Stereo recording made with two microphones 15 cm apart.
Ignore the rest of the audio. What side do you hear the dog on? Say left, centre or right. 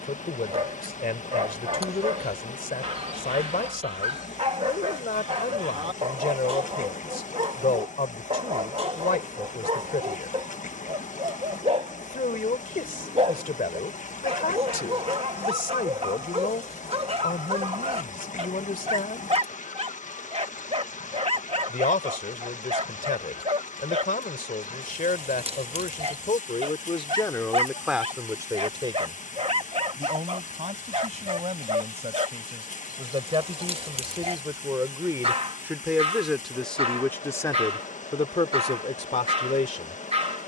right.